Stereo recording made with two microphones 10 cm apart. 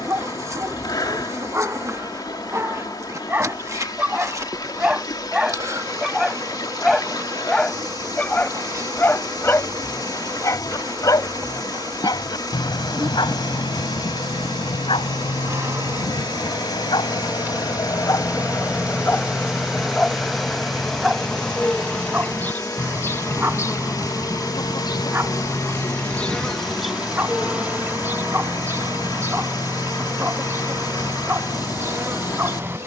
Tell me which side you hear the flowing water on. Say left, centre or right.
left.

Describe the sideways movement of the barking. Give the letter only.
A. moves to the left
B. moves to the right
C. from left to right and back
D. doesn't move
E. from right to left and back
E.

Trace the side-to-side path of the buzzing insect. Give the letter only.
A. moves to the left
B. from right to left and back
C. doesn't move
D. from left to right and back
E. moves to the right
B.